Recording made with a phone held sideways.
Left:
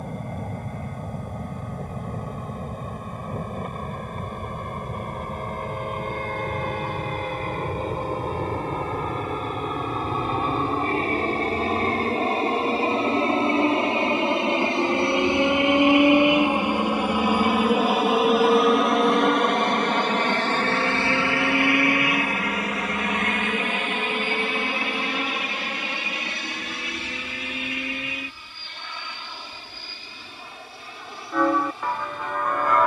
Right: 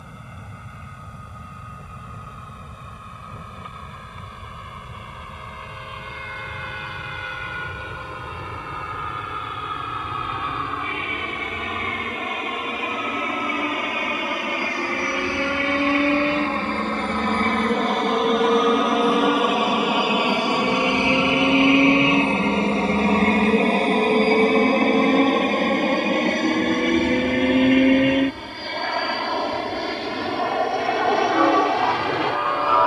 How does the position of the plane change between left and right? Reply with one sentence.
You can hear the plane go from the left side to the right.